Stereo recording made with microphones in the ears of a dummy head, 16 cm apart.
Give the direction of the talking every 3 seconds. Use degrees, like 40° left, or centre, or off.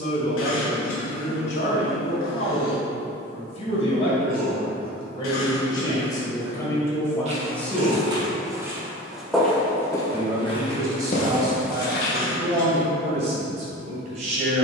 50° left, 30° left, 10° left, 20° right, 40° right.